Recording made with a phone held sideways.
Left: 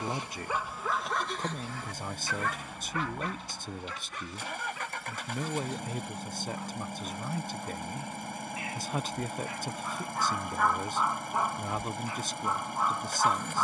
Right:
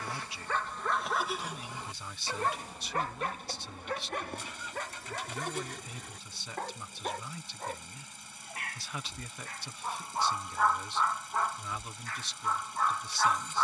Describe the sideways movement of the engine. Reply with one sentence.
You can hear the engine stay put.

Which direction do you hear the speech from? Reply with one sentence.
In this clip you hear the speech on the left.